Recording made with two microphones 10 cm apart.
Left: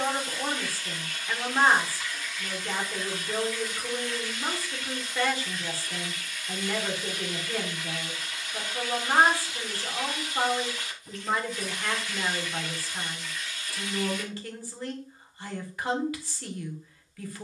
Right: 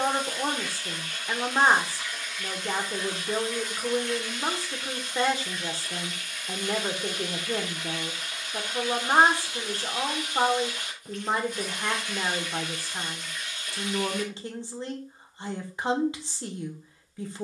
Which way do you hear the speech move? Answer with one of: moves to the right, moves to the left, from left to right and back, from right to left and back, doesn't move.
doesn't move.